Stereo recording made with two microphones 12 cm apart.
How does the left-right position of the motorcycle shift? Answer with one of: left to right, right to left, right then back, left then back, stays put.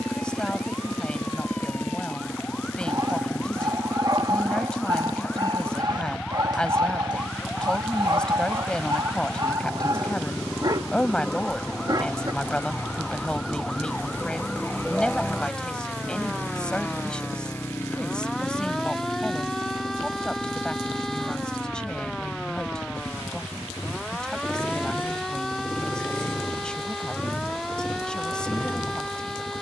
stays put.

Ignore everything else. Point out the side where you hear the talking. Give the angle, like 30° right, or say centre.
10° left.